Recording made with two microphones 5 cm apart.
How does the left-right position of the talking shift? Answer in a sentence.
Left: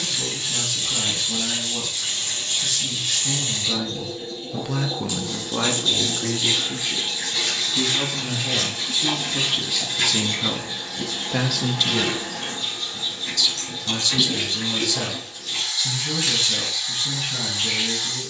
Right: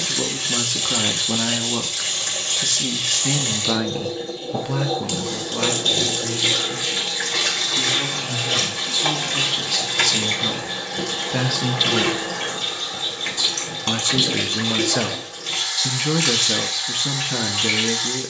In this clip you hear the talking go left and come back.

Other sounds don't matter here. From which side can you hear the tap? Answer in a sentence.
In this clip you hear the tap on the right.